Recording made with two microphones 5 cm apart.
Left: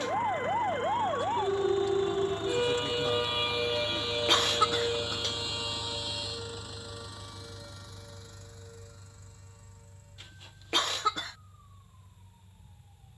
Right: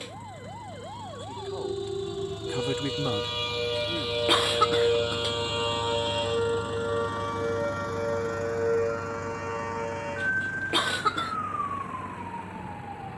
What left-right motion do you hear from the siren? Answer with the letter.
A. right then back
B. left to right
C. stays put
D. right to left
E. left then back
B.